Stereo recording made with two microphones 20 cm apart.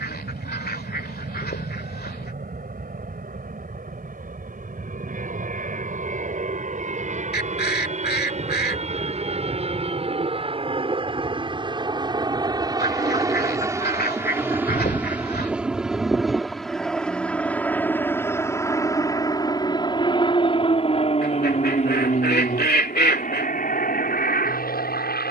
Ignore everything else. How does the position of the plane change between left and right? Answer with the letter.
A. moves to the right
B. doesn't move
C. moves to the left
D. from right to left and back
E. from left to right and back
C.